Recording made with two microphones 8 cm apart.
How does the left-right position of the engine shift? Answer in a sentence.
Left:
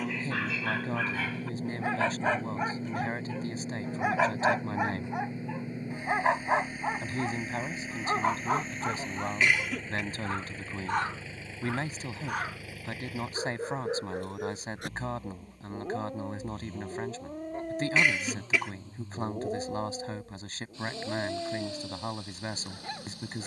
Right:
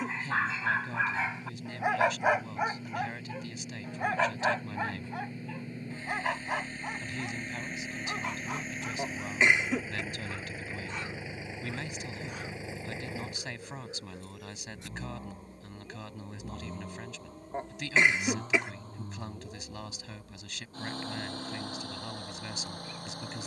In this clip you hear the engine move to the right.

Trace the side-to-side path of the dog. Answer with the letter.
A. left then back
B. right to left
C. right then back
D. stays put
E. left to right
B.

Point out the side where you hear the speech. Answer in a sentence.
In this clip you hear the speech on the left.